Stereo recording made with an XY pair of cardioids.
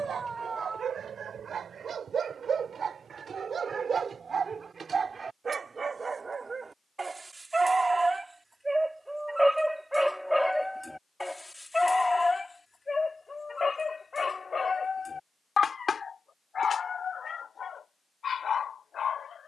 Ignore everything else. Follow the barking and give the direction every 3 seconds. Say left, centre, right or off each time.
right, right, right, centre, left, left, left.